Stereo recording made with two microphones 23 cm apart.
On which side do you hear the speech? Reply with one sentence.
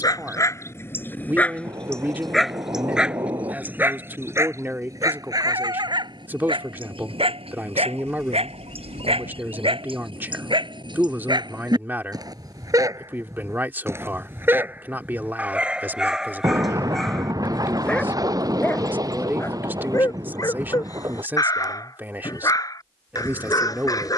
You can hear the speech in the centre.